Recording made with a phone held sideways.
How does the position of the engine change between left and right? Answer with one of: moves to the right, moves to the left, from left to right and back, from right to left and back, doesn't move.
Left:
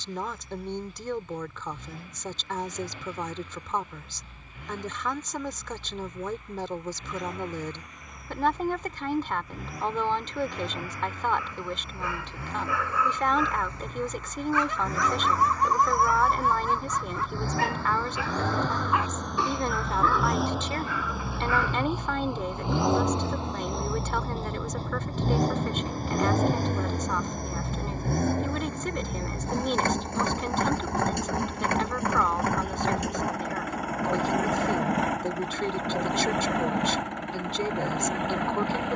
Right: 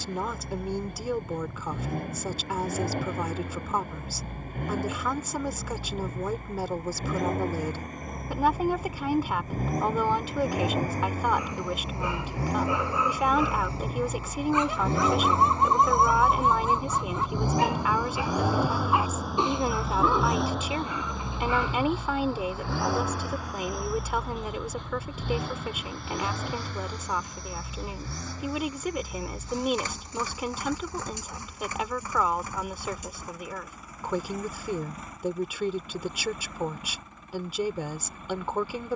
moves to the left.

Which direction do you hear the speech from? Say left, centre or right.
centre.